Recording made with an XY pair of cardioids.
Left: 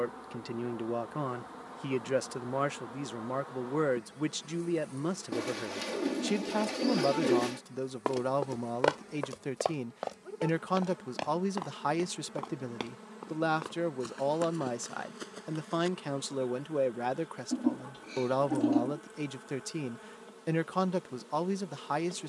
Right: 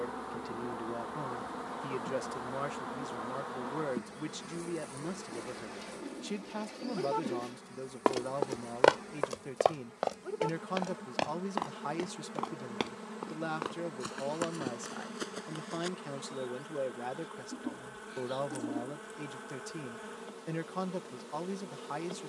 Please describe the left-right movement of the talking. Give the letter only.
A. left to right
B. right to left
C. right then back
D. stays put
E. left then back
D.